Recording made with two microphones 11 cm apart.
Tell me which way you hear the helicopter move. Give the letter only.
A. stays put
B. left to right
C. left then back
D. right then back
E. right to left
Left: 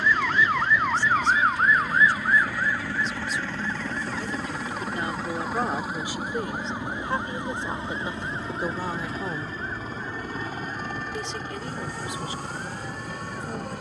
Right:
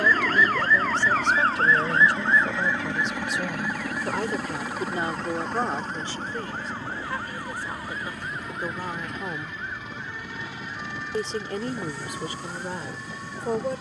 E.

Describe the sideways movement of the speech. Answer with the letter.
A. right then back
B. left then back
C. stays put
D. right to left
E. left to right
B.